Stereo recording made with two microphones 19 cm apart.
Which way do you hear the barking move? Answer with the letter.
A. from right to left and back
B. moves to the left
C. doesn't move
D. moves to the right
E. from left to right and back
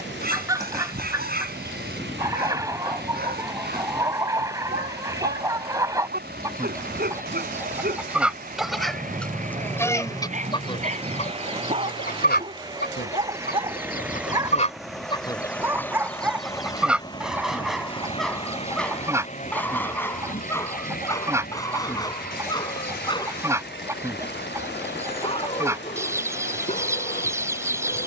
B.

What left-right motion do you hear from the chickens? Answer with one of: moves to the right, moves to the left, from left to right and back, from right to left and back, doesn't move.
from right to left and back.